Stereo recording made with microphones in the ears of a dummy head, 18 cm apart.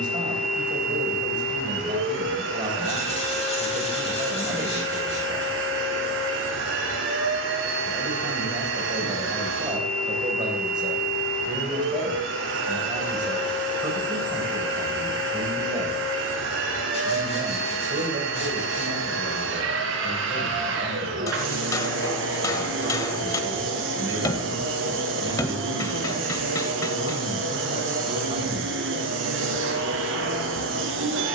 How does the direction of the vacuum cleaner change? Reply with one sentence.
In this clip you hear the vacuum cleaner stay in one place.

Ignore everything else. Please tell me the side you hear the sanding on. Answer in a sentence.
You can hear the sanding on the left.